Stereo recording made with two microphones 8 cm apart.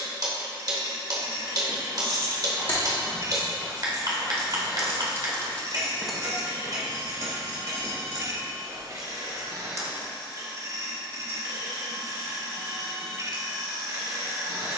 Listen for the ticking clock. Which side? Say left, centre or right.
right.